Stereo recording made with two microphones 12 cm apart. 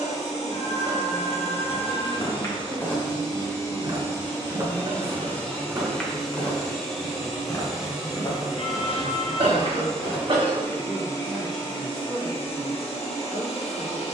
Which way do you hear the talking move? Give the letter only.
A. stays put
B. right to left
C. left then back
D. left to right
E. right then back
B.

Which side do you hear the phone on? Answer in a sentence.
You can hear the phone on the left.